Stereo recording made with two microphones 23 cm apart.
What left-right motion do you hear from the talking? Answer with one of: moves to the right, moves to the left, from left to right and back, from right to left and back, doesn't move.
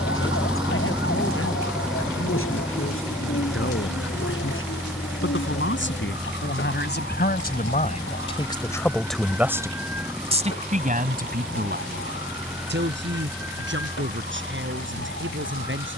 moves to the right.